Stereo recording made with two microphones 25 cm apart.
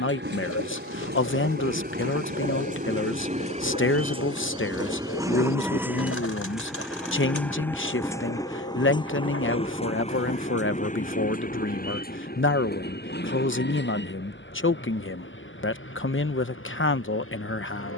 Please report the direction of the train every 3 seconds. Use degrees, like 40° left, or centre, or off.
40° right, 20° right, 10° left, 30° left, 40° left, 50° left.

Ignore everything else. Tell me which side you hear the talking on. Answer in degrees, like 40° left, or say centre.
50° left.